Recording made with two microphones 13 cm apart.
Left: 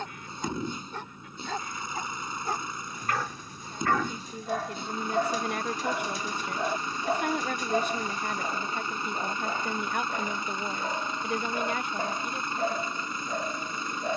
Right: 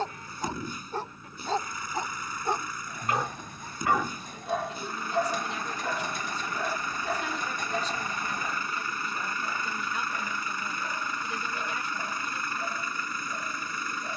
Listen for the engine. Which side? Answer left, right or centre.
left.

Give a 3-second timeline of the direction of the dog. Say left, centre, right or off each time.
right, centre, left, left, left.